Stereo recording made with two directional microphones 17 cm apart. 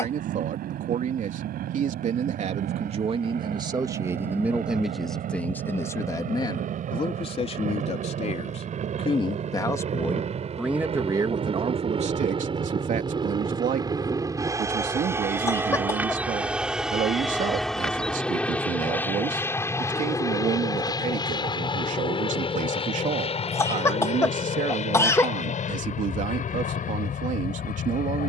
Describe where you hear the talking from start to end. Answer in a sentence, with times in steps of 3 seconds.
You can hear the talking on the right from 0 s, in the centre from 3 s, on the left from 6 s, in the centre from 9 s and on the right from 12 s.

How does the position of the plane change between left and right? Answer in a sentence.
You can hear the plane move to the left.